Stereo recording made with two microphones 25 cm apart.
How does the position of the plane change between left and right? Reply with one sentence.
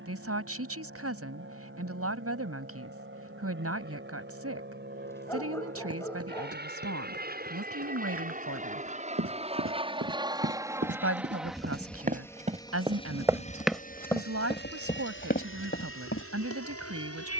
You can hear the plane move from right to left.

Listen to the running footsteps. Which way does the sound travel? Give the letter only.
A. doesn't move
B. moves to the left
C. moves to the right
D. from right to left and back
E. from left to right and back
B.